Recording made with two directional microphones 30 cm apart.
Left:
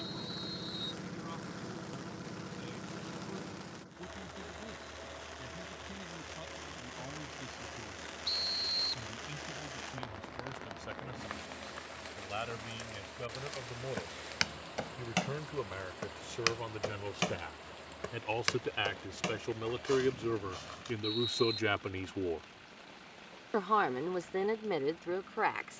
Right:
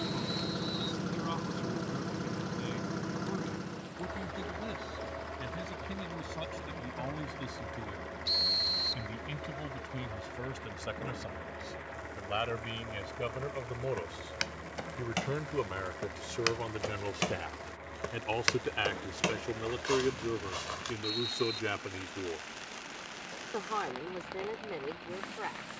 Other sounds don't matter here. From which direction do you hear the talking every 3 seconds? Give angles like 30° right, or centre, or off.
60° right, 60° right, 50° right, 50° right, 40° right, 30° right, 10° right, 20° left, 50° left.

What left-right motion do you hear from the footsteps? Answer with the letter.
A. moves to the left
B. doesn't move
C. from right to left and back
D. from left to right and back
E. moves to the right
E.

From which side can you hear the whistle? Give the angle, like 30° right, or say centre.
10° right.